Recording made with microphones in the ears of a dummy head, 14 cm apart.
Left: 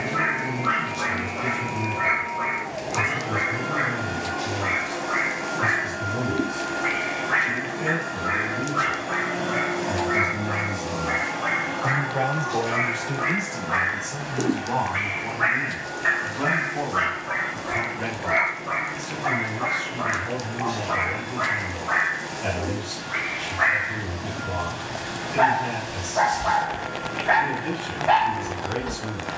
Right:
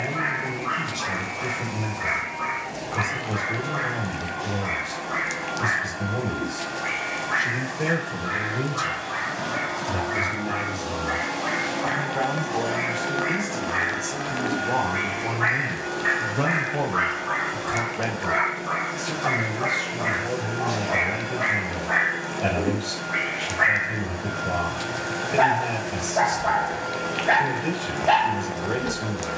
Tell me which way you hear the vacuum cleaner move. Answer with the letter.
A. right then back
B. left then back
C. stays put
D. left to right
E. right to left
D.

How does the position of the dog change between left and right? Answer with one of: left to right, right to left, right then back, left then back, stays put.
left to right.